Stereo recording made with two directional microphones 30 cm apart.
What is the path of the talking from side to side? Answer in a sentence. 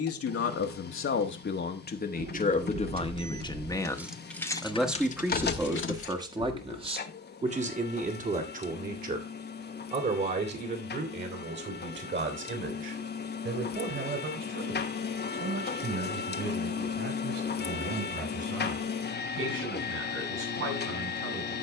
In this clip you hear the talking go from the left side to the right.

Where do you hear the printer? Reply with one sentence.
You can hear the printer on the left.